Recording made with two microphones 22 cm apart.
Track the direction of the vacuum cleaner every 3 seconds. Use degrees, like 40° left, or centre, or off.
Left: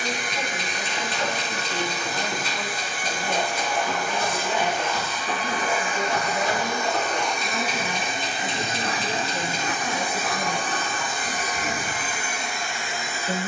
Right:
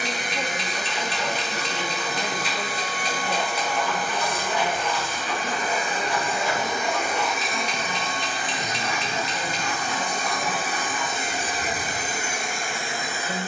60° right, 50° right, centre, centre, 50° right.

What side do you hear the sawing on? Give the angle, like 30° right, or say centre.
50° left.